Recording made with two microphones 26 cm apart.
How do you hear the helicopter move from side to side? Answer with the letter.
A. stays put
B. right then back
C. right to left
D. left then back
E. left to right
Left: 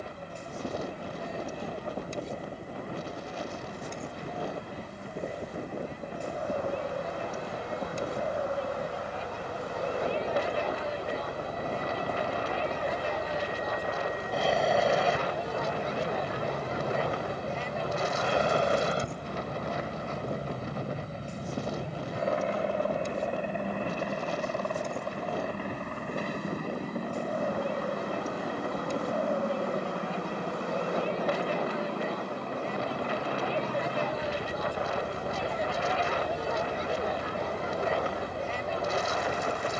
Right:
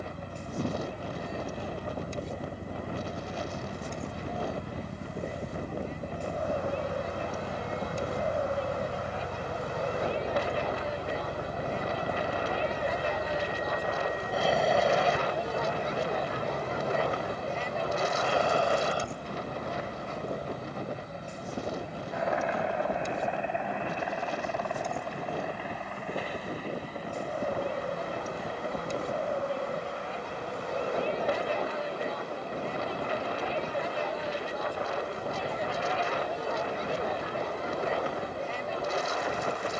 C.